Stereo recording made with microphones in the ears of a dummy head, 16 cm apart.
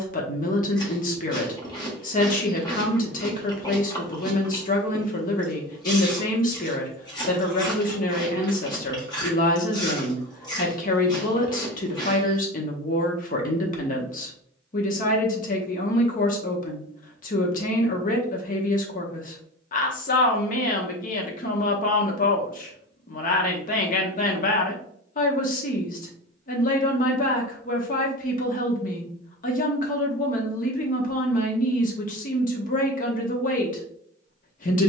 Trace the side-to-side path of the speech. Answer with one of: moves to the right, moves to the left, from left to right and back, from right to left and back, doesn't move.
doesn't move.